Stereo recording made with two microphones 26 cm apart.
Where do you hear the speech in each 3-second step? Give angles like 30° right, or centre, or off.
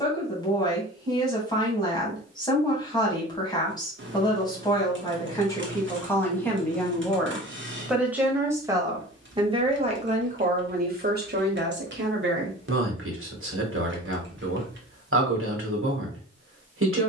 10° left, 10° left, centre, 30° right, 50° right, 50° right.